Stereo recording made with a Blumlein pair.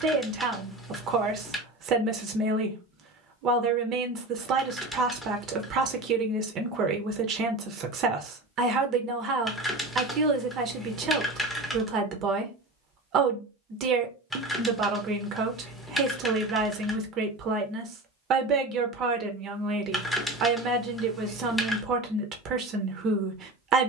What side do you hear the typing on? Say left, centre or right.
centre.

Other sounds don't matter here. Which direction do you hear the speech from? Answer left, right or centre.
right.